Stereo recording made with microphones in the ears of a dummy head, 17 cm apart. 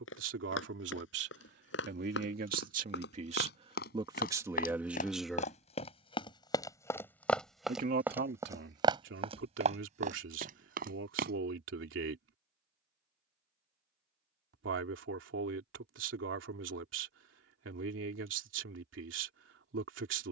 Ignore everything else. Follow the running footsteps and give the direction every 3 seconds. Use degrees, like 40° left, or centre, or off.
70° left, 50° left, centre, 40° right, off, off, off.